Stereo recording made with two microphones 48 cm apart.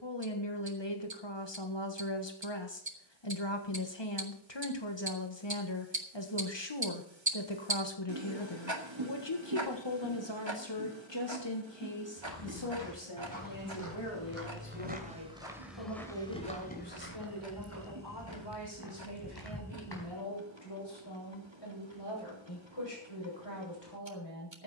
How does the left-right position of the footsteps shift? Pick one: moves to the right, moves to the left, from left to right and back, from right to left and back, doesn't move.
moves to the left.